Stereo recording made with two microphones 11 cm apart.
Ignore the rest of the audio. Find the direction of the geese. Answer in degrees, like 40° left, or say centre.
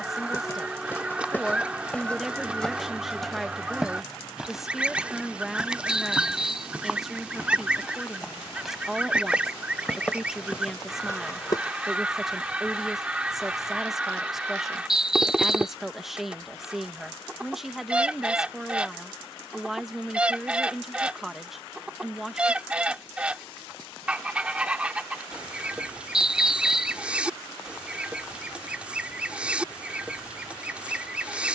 10° right.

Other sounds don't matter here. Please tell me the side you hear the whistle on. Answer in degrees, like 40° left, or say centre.
10° right.